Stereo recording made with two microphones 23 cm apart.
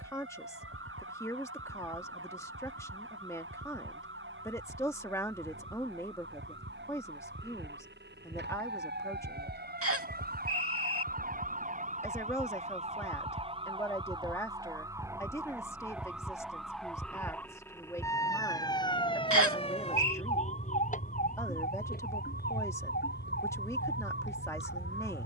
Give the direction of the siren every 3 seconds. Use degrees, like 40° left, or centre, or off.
60° right, 60° right, 50° right, 40° right, 20° right, centre, 20° left, 40° left, 50° left.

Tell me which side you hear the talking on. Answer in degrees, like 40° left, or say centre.
10° left.